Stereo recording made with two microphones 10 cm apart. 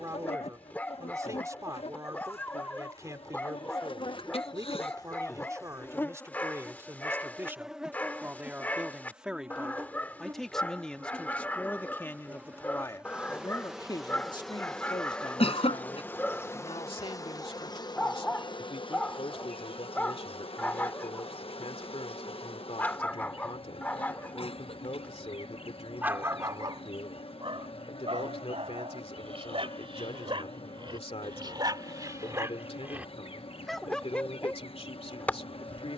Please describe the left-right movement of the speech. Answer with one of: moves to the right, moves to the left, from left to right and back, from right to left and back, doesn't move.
moves to the left.